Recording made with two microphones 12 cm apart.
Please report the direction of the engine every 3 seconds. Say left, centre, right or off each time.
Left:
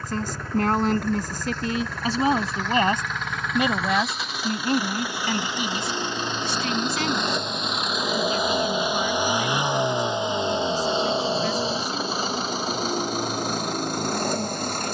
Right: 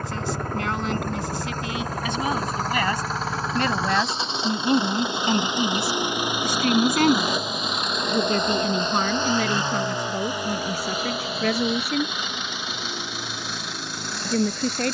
right, right, centre, left, left.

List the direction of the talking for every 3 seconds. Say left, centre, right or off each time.
left, centre, right, right, right.